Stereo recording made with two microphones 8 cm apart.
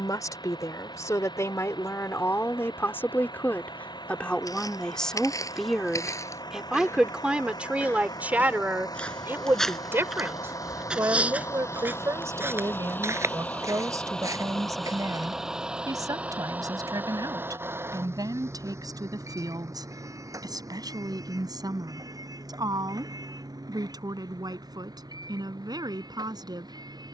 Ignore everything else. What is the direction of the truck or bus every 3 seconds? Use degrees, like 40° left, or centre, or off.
80° left, 70° left, 70° left, 50° left, 20° left, 20° right, 40° right, 60° right, 60° right.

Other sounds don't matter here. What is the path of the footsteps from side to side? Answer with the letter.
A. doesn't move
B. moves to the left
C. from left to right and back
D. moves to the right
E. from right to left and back
D.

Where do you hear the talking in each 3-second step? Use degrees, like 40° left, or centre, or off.
40° left, 10° left, 10° right, 30° right, 50° right, 50° right, 60° right, 60° right, 60° right.